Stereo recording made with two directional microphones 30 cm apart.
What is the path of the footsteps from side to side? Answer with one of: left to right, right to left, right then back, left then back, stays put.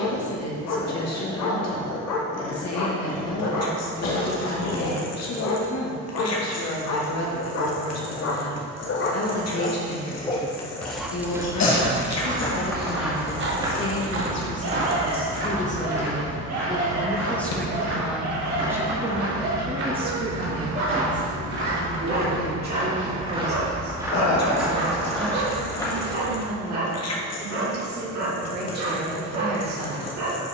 right then back.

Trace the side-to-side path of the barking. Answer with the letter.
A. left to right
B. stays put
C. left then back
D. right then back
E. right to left
A.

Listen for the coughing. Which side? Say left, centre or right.
left.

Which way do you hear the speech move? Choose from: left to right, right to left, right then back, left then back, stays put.
left to right.